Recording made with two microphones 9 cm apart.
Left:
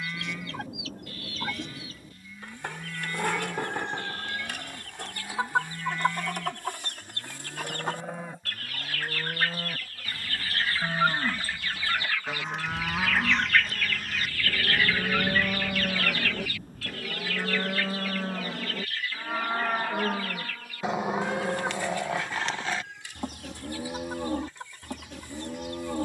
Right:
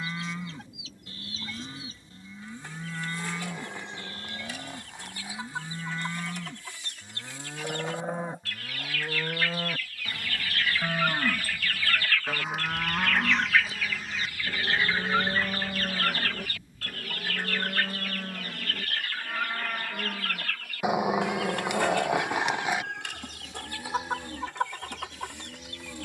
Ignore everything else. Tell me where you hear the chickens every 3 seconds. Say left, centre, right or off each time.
left, left, left, left, centre, right, right, right, right.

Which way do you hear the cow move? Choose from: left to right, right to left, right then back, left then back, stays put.
right to left.